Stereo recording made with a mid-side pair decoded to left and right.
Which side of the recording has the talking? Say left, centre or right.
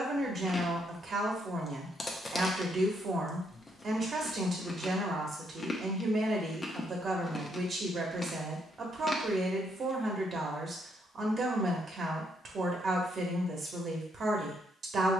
right.